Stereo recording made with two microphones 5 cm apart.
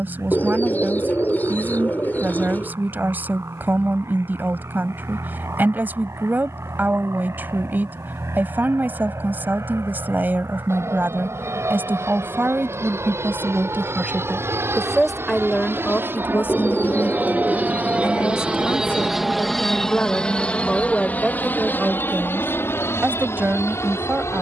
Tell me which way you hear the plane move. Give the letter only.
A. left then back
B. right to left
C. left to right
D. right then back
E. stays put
B.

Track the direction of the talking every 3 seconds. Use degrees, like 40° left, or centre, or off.
40° right, 40° right, 40° right, 40° right, 30° right, 30° left, 30° left, 30° right.